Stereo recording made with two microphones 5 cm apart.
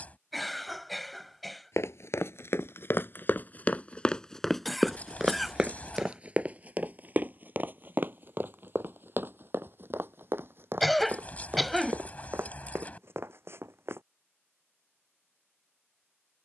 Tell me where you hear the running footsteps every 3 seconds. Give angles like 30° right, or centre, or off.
60° left, 10° left, 40° right, 50° right, 50° right, off.